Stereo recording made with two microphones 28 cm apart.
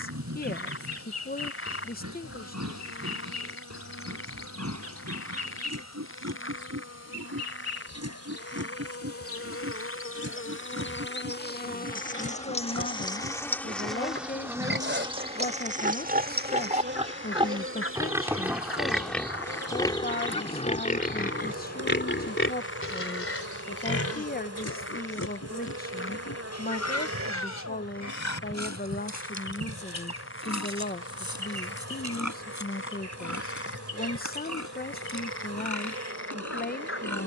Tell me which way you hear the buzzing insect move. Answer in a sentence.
You can hear the buzzing insect go from the left side to the right.